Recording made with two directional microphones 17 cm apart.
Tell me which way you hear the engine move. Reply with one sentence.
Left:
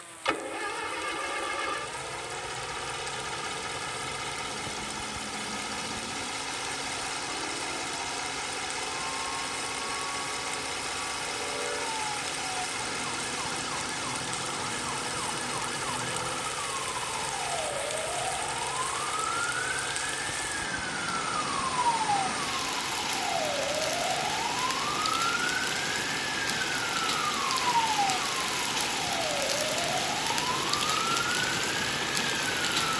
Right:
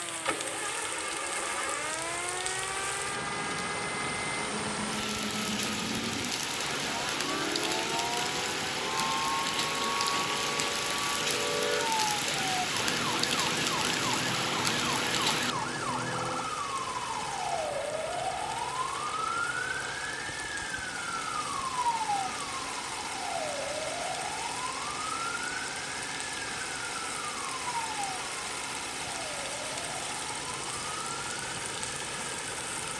You can hear the engine stay in one place.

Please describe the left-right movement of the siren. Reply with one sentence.
In this clip you hear the siren travel towards the left.